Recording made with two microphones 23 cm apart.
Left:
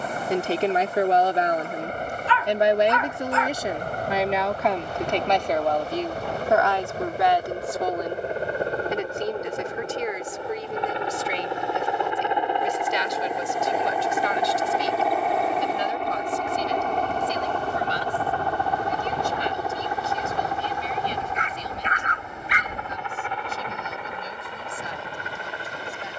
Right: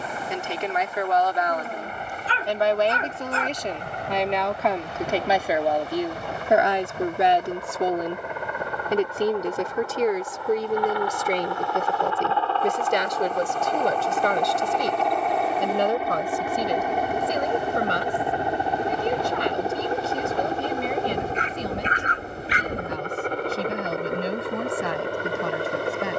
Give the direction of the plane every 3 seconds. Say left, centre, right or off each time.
left, left, left, left, centre, centre, right, right, right.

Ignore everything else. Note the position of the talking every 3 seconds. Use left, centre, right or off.
left, centre, right, right, right, right, right, right, right.